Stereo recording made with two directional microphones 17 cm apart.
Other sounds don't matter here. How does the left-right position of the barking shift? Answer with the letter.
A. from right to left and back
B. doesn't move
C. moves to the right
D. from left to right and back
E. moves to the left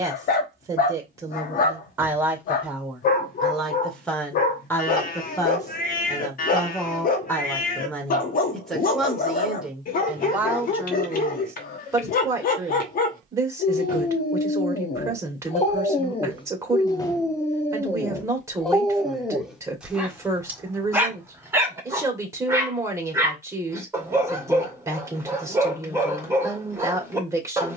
C.